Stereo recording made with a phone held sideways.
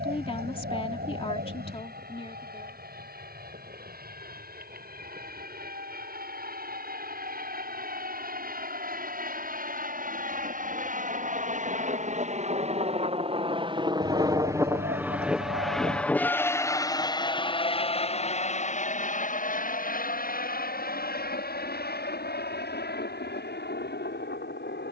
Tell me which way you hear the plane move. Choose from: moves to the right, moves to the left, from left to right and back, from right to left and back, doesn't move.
moves to the left.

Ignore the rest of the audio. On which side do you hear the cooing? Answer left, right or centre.
right.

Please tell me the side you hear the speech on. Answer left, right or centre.
left.